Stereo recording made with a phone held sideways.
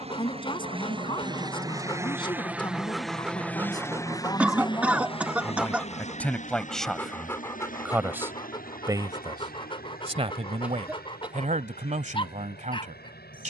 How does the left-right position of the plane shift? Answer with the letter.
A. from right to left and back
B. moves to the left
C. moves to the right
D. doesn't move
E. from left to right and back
B.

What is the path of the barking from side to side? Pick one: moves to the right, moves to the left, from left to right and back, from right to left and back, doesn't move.
from left to right and back.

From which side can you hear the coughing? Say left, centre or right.
centre.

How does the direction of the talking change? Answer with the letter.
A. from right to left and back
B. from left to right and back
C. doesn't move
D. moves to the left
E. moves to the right
E.